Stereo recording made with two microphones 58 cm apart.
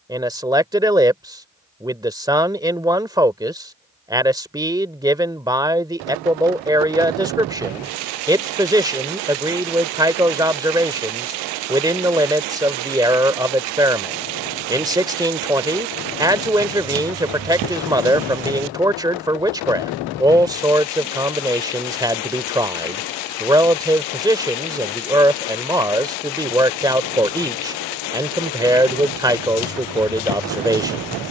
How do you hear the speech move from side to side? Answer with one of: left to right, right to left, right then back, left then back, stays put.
stays put.